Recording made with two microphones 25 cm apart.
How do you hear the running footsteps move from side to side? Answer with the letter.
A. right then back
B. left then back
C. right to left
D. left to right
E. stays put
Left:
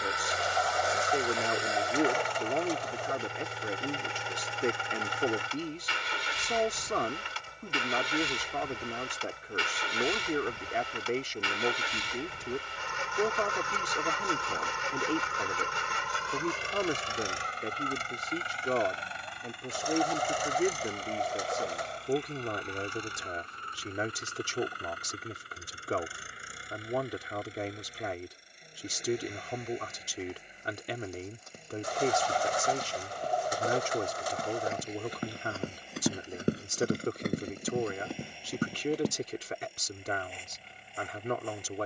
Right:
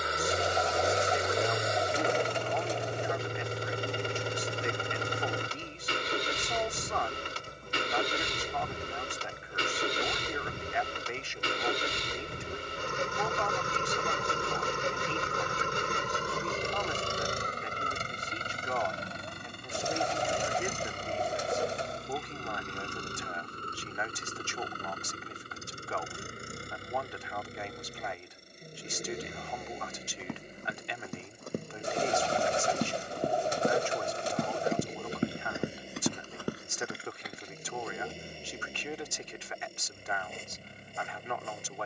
C.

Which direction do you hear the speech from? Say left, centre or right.
left.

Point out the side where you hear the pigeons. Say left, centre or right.
right.